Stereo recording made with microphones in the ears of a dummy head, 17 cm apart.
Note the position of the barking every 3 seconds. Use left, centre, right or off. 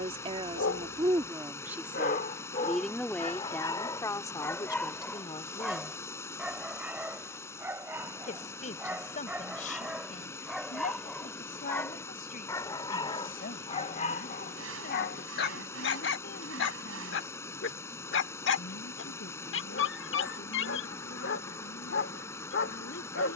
left, centre, centre, centre, left, left, left, left.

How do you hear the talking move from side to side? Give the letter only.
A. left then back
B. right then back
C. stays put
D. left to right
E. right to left
E.